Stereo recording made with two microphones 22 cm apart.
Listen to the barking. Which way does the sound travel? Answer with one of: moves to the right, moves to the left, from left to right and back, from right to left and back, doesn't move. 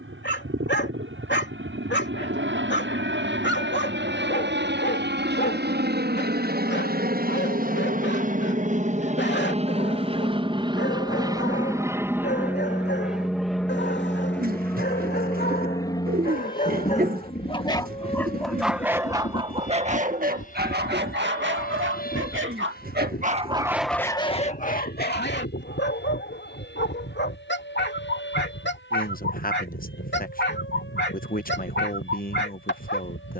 from left to right and back.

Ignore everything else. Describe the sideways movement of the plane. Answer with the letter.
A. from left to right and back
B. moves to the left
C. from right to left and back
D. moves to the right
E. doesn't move
B.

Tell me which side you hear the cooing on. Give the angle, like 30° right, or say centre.
40° right.